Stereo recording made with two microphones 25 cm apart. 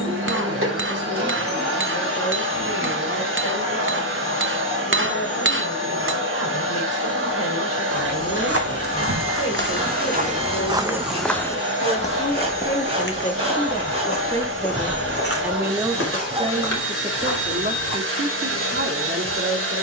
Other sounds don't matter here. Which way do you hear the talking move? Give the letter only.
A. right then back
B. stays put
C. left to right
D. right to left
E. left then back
C.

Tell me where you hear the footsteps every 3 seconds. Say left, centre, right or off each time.
off, off, right, right, left, left, off.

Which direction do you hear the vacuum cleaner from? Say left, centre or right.
right.